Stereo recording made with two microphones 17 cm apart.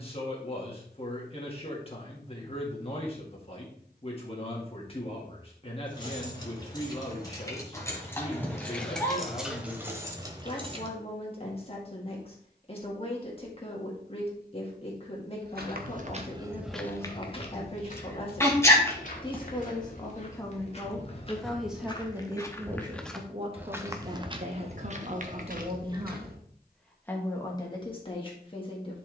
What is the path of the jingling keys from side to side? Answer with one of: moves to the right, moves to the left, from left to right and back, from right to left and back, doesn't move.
moves to the right.